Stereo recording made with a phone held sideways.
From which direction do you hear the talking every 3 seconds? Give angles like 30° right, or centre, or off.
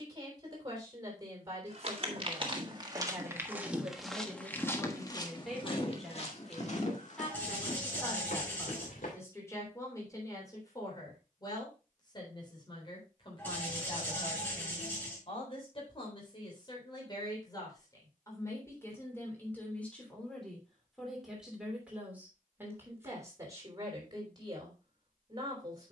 20° right, 10° right, 10° left, 20° left, 40° left, 30° left, 10° left, 10° right, 30° right.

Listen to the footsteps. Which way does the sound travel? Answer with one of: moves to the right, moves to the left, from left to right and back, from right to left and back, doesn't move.
moves to the left.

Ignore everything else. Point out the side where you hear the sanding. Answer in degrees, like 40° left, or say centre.
10° left.